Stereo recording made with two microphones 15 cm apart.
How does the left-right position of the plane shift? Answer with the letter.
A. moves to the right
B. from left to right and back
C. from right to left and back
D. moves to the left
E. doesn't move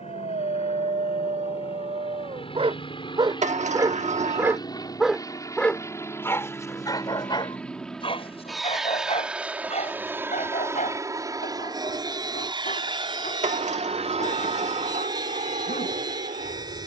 A.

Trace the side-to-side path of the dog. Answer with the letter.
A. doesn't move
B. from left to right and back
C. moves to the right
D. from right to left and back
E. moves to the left
E.